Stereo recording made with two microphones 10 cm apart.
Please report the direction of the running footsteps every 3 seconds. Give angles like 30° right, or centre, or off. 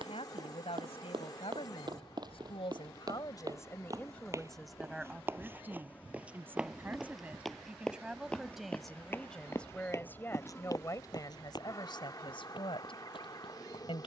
50° right, 30° right, centre, 30° left, 50° left.